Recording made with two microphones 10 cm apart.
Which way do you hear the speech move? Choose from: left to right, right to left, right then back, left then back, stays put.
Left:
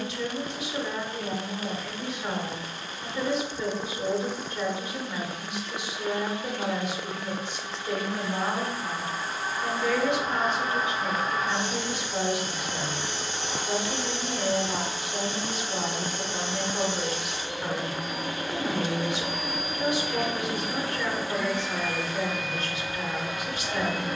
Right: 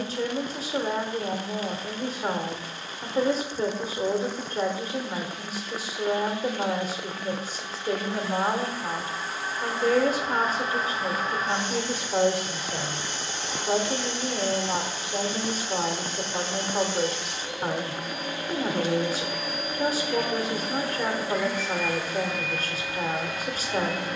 stays put.